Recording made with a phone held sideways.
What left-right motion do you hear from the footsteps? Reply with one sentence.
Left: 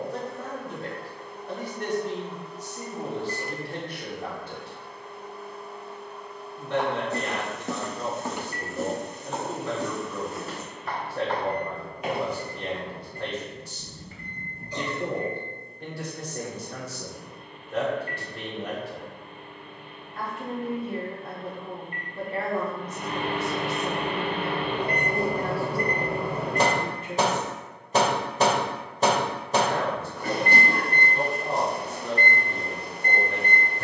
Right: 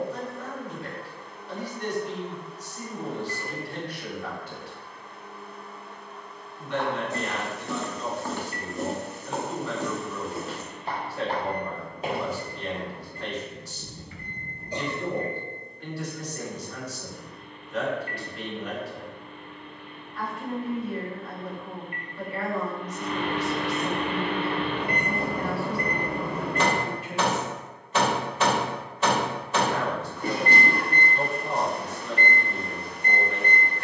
You can hear the footsteps move from left to right.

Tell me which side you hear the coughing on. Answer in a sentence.
You can hear the coughing on the right.